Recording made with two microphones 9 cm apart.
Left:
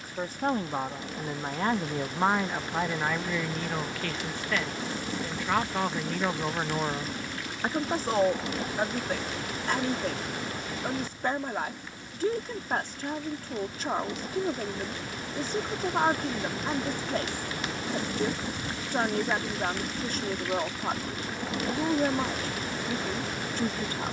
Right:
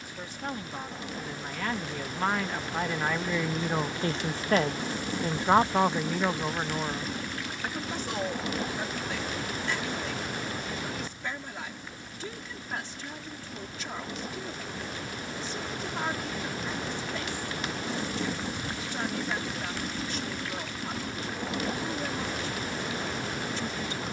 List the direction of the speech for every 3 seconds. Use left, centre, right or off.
left, right, left, left, left, left, left, left.